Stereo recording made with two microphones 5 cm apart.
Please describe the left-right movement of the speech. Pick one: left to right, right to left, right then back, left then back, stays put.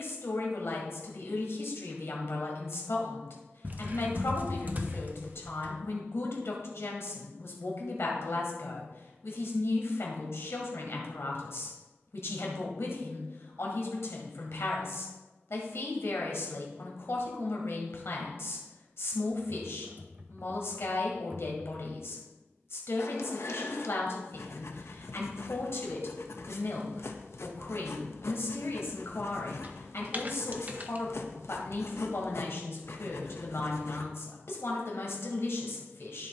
stays put.